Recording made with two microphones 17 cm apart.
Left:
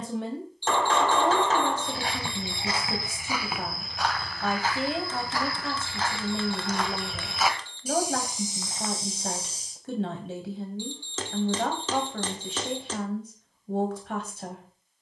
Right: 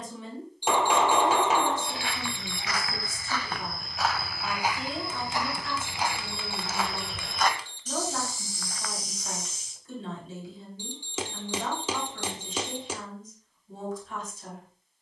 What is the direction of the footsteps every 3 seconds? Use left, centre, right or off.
left, centre, centre, left, off.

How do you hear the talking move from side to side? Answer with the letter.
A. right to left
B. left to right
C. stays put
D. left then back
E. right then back
C.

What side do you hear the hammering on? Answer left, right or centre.
centre.